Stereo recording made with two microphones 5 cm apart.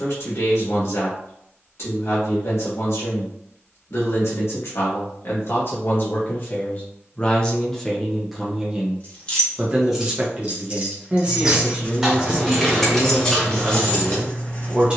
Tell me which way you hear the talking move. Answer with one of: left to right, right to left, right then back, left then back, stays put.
left to right.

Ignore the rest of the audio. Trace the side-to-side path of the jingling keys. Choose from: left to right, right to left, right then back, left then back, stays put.
right then back.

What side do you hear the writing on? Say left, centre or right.
left.